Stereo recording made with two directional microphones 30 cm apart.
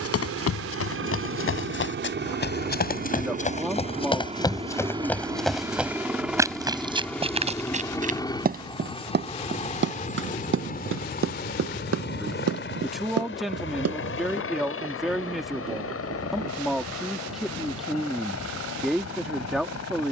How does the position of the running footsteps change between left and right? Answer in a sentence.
You can hear the running footsteps move from left to right.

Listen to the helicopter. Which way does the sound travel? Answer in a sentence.
In this clip you hear the helicopter go from the right side to the left.